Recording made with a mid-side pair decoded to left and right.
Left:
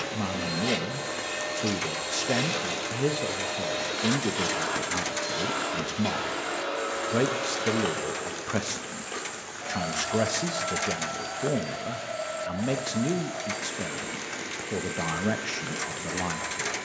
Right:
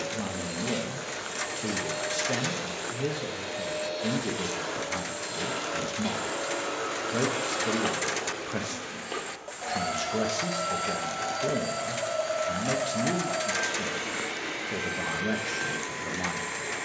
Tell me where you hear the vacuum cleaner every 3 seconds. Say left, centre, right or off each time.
left, left, centre, right, right, right.